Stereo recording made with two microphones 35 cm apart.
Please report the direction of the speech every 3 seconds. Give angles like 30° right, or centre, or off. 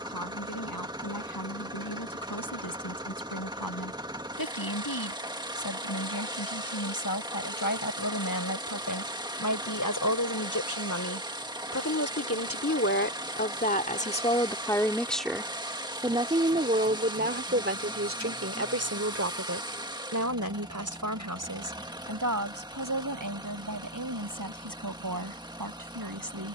80° left, 70° left, 70° left, 60° left, 30° left, 20° right, 50° right, 60° right, 70° right.